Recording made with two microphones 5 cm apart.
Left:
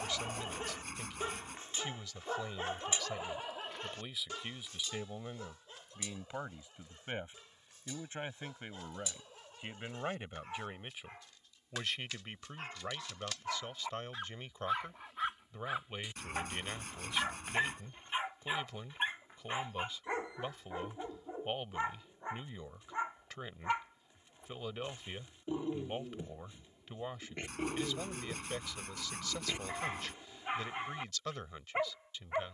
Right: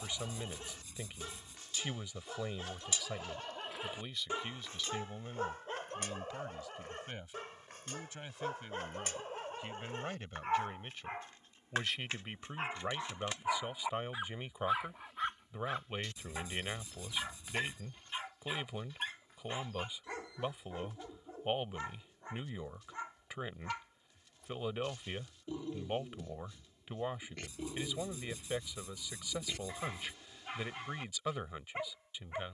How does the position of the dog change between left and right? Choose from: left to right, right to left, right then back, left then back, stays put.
right then back.